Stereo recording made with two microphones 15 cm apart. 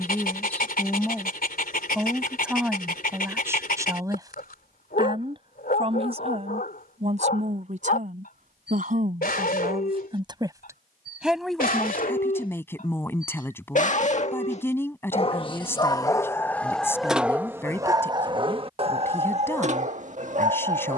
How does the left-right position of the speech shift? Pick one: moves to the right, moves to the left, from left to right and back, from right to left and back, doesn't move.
from left to right and back.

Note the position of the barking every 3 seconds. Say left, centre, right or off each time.
left, left, left, left, left, centre, right.